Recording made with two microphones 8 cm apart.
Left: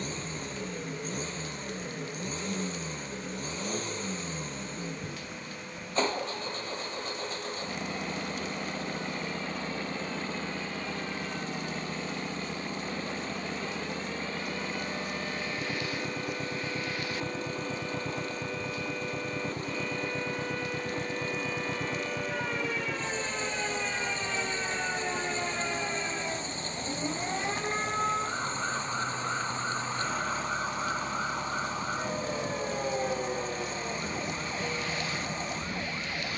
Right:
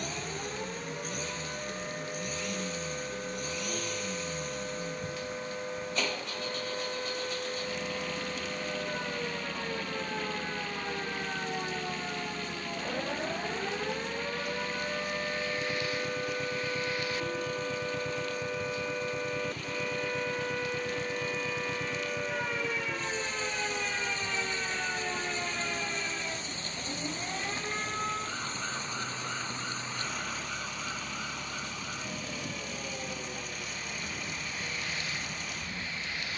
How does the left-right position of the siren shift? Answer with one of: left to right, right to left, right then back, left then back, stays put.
right to left.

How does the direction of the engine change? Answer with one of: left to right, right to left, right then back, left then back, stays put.
stays put.